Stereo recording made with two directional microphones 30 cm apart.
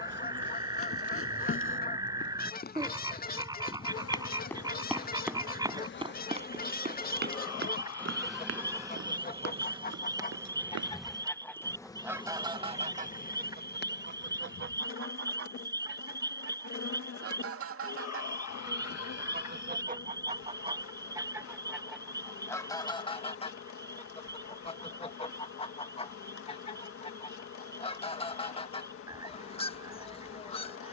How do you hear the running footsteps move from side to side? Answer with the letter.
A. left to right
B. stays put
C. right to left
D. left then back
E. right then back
A.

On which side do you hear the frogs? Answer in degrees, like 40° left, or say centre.
10° right.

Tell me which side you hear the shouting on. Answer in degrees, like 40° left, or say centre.
50° left.